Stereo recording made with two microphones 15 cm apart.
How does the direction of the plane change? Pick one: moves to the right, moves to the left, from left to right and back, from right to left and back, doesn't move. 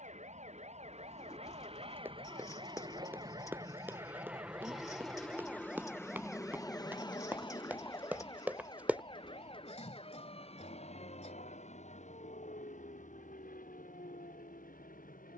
moves to the left.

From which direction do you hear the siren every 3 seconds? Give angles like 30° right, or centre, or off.
50° right, 20° right, 10° left, 40° left, 50° left.